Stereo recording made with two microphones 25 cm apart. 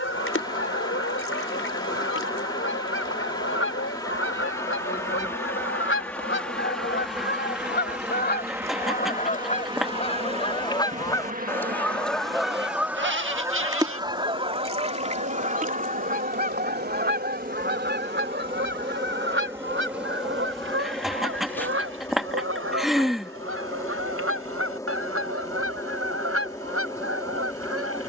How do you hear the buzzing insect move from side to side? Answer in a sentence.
You can hear the buzzing insect move from left to right and back again.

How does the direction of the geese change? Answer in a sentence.
You can hear the geese go from the left side to the right.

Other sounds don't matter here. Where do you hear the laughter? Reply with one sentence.
You can hear the laughter in the centre.